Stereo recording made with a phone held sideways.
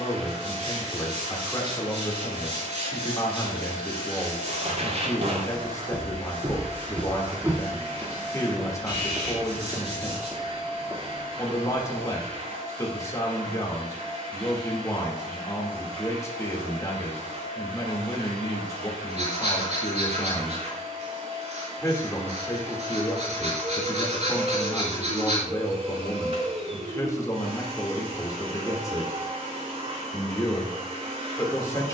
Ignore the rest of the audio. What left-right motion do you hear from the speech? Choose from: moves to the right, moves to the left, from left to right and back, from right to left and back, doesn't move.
doesn't move.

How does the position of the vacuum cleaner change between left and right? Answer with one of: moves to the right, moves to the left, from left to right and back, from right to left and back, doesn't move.
doesn't move.